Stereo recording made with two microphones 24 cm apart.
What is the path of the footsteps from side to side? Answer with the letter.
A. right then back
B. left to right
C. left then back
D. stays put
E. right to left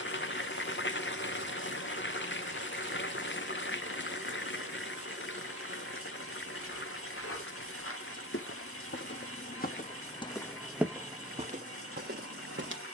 B.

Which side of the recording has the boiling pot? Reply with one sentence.
You can hear the boiling pot on the left.